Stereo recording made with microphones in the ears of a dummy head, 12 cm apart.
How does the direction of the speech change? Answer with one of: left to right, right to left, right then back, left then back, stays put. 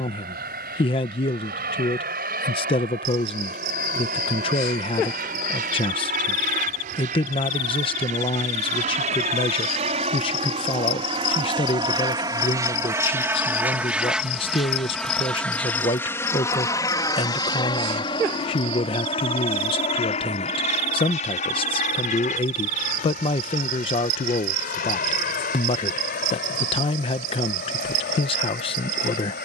stays put.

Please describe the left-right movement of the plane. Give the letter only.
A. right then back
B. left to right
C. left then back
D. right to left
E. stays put
D.